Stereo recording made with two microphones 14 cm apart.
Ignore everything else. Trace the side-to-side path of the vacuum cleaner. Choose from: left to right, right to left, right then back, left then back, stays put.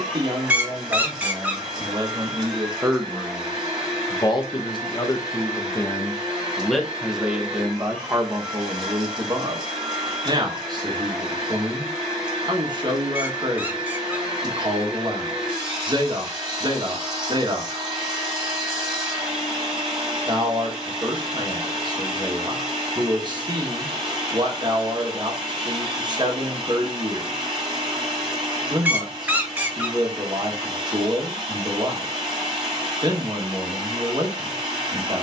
stays put.